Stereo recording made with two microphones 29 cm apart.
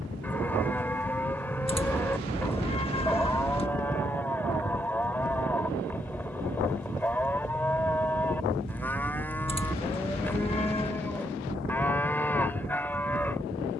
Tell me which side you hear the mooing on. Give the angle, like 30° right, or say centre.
10° left.